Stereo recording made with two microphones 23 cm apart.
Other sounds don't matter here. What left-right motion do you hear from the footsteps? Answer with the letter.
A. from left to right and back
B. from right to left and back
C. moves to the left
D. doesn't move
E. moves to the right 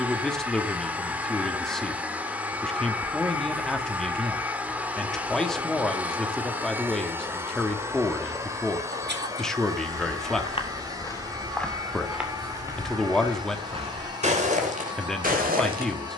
E.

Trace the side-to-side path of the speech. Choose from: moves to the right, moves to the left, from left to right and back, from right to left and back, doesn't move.
doesn't move.